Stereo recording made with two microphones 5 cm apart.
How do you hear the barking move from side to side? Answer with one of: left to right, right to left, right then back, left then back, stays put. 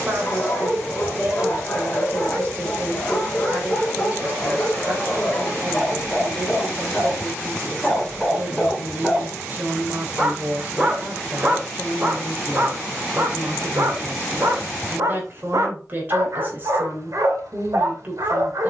left to right.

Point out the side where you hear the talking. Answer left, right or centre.
right.